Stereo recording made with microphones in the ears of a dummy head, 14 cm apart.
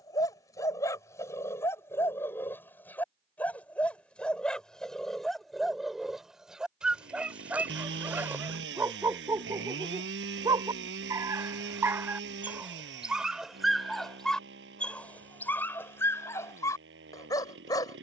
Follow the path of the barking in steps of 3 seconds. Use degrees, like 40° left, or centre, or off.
20° left, centre, 10° right, 20° right, centre, 20° left.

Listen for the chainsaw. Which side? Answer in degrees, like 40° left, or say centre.
80° right.